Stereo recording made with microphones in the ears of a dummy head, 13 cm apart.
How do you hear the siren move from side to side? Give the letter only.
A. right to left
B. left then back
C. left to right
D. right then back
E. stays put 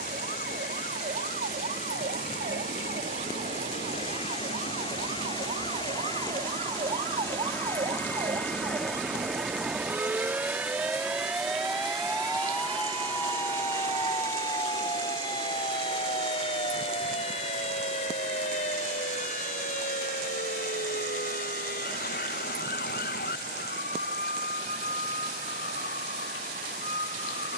A.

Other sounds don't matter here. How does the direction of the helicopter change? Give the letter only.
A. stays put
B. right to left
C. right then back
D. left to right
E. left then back
D.